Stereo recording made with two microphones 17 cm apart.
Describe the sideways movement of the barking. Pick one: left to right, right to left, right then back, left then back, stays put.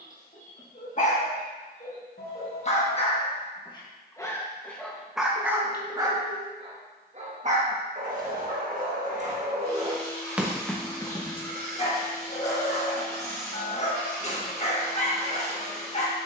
right then back.